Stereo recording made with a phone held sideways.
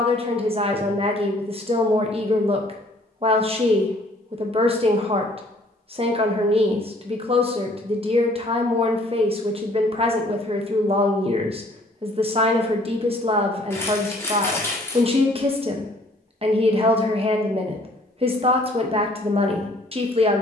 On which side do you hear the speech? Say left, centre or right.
right.